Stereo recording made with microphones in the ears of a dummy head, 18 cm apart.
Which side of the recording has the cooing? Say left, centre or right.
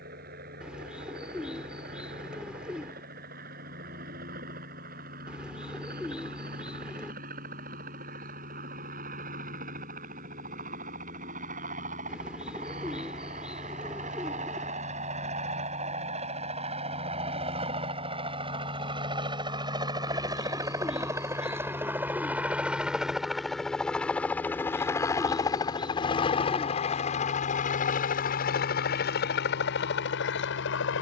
centre.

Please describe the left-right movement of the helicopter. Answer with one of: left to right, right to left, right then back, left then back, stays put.
right to left.